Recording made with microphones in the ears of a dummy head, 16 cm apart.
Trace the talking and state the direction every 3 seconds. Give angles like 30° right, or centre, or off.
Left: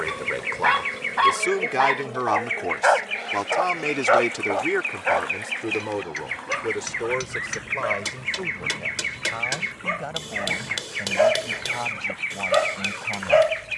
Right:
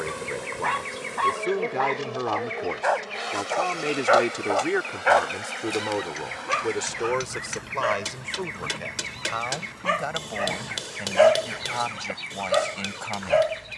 50° left, 10° left, 30° right, 40° right, 50° right.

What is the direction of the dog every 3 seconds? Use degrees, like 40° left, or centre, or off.
40° left, 20° right, 60° right, 40° right, 20° left.